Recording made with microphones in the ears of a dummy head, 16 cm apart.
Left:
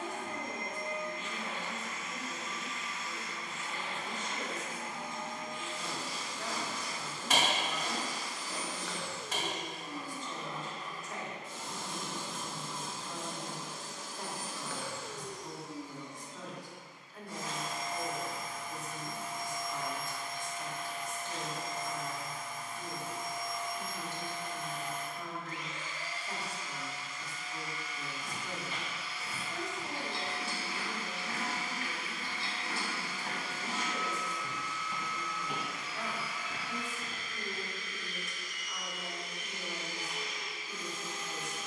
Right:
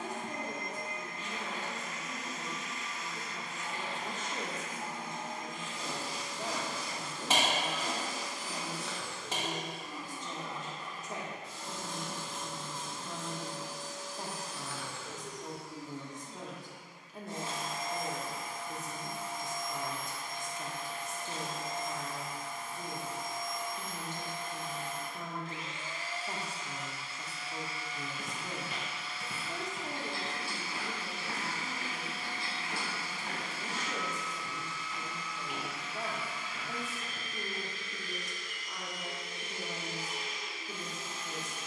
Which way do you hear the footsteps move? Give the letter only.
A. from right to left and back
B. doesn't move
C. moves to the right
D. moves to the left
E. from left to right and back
D.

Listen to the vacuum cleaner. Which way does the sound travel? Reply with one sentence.
In this clip you hear the vacuum cleaner move from right to left and back again.